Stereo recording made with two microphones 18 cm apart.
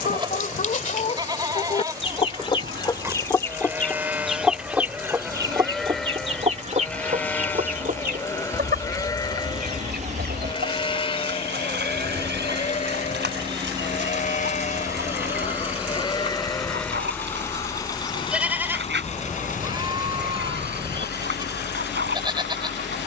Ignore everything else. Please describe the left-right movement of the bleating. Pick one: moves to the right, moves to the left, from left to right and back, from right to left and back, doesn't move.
from right to left and back.